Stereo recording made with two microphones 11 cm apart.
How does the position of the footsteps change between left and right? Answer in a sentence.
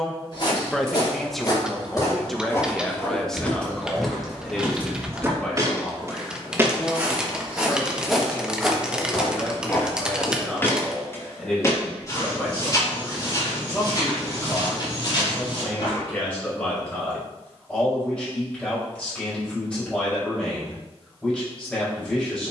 In this clip you hear the footsteps move from left to right and back again.